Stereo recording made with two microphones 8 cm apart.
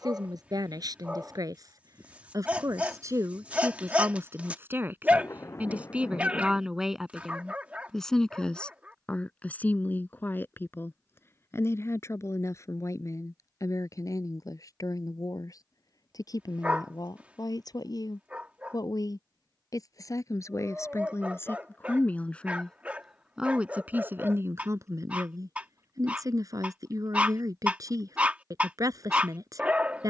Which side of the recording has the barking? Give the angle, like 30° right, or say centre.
20° right.